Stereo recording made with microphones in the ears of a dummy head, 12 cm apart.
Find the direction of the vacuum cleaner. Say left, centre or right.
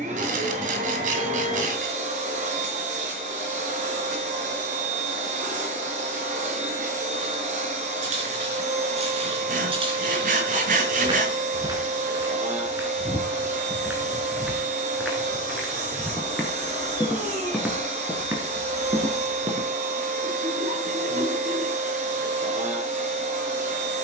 right.